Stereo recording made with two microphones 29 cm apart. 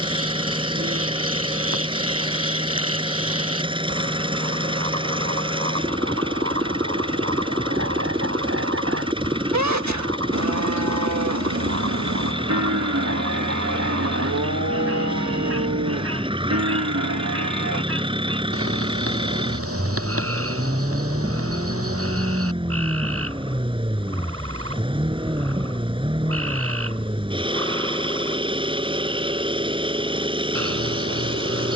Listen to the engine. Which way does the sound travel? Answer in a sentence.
You can hear the engine stay in one place.